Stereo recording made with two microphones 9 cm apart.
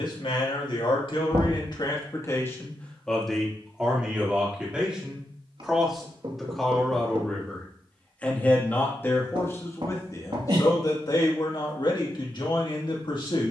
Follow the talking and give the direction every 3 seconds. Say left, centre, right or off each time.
left, centre, centre, left, left.